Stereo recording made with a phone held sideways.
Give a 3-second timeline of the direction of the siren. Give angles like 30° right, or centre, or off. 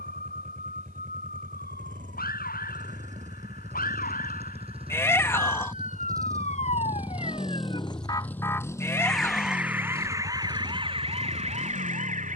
70° left, 60° left, 30° left, 20° right.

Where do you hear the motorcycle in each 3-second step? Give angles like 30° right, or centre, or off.
60° right, 40° right, centre, 40° left.